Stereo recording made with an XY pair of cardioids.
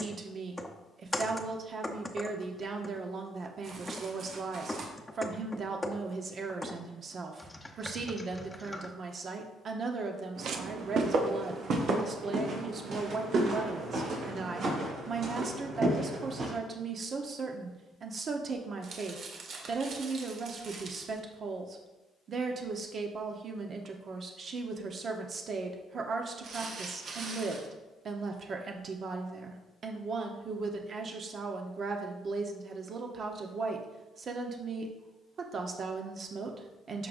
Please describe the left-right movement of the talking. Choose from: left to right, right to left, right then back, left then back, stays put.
stays put.